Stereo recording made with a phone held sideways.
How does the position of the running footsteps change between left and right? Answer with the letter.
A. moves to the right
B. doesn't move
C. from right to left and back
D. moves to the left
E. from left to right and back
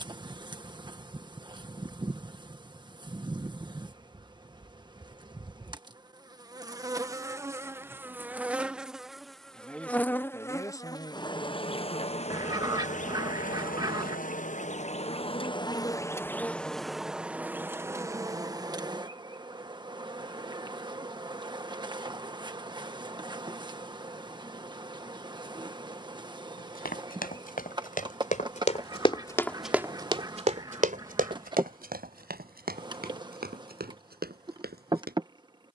A.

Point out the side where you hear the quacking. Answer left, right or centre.
right.